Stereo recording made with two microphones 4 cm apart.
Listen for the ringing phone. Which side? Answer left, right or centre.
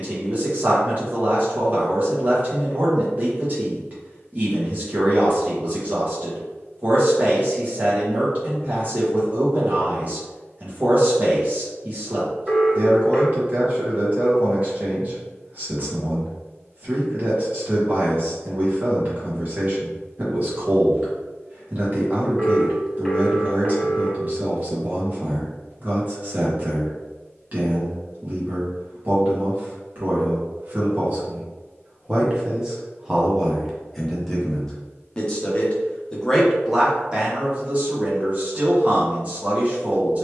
centre.